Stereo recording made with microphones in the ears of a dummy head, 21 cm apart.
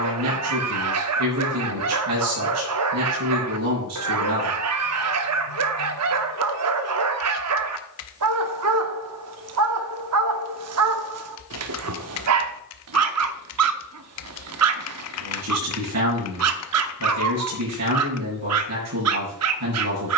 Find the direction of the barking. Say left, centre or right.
right.